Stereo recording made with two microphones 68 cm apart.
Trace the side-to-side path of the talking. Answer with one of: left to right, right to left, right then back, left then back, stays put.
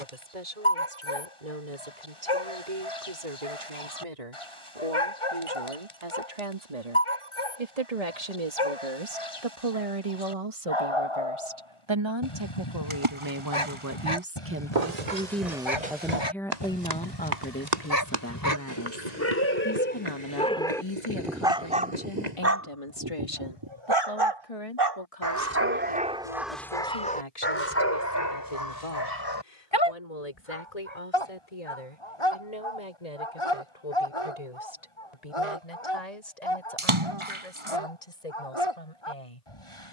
right to left.